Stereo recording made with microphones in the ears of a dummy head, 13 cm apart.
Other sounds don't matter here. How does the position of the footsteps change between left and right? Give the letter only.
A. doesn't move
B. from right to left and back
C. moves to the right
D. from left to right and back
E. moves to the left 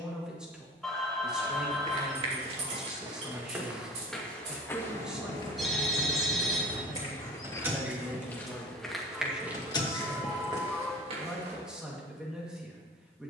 B.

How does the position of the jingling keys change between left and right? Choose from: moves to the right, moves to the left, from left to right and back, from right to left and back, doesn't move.
moves to the left.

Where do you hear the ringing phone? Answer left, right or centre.
centre.